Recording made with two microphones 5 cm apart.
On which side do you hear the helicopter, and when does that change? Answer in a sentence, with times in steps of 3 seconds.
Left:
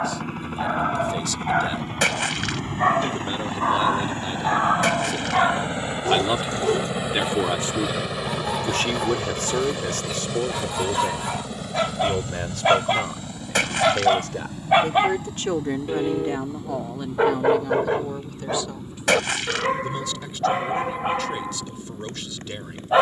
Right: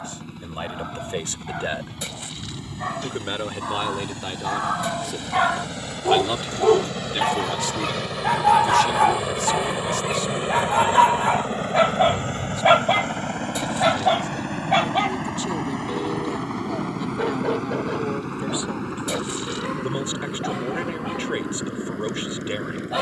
You can hear the helicopter on the left from 0 s, in the centre from 6 s and on the right from 9 s.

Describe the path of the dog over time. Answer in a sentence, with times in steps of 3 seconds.
You can hear the dog on the left from 0 s, on the right from 6 s, in the centre from 12 s and on the left from 15 s.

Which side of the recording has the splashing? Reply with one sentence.
You can hear the splashing on the left.